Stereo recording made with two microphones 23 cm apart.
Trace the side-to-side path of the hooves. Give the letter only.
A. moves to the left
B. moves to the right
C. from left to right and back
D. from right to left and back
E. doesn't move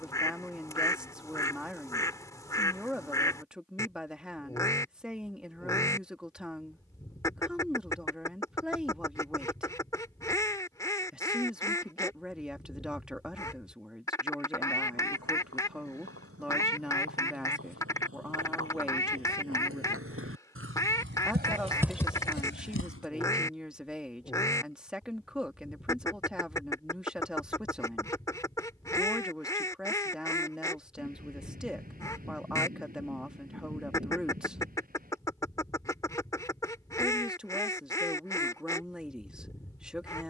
A.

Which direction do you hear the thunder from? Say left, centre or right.
right.